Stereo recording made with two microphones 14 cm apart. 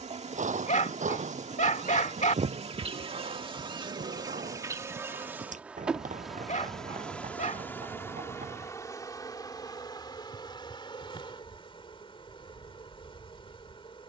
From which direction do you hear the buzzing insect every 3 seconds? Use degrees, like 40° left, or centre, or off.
50° right, 20° right, 10° left, 30° left, 40° left.